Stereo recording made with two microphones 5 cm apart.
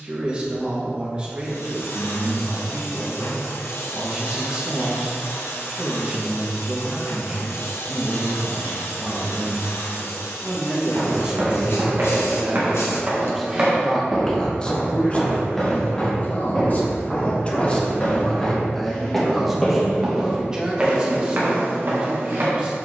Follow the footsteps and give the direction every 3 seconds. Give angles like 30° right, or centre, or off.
off, off, off, 60° right, 20° right, 20° left, centre, 40° right.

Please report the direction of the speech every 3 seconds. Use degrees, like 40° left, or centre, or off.
20° right, 20° right, 20° right, 20° right, 10° left, 30° left, centre, 20° right.